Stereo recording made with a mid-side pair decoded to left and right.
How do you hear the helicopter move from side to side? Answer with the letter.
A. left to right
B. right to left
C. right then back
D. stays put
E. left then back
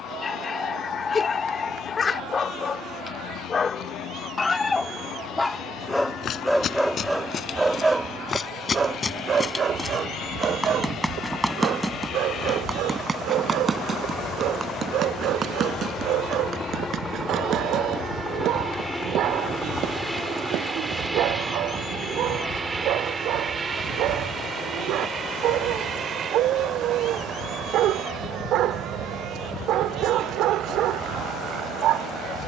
A.